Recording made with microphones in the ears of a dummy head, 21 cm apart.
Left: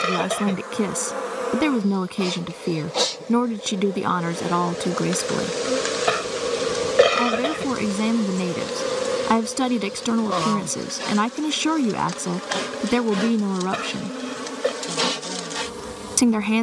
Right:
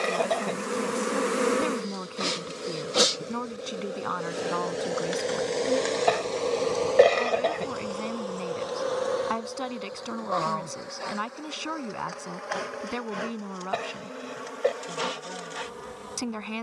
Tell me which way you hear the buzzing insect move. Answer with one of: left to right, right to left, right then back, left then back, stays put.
right to left.